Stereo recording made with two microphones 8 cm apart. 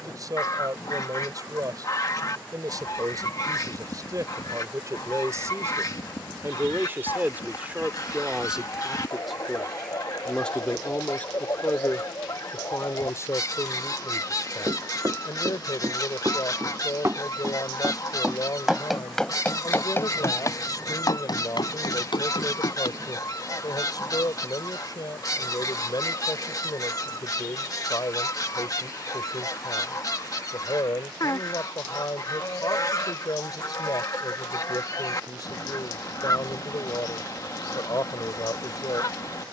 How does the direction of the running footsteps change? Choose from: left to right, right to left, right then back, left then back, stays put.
right to left.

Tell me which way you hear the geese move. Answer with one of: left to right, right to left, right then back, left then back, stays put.
stays put.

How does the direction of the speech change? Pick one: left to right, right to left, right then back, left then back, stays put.
right to left.